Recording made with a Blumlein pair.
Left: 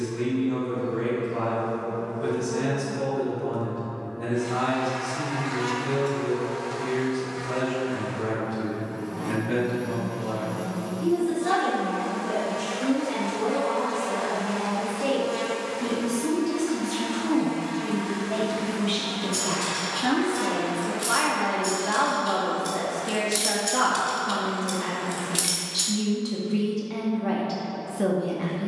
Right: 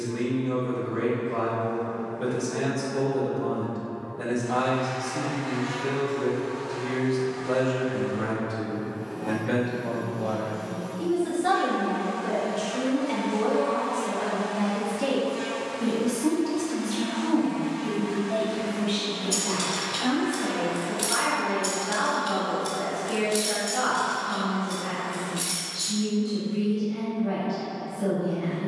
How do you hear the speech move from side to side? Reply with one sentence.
You can hear the speech move to the left.